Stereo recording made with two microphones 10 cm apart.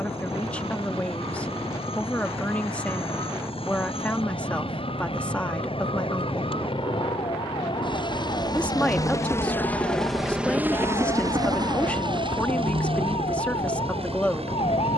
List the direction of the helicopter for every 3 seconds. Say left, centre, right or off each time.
left, left, left, centre, right.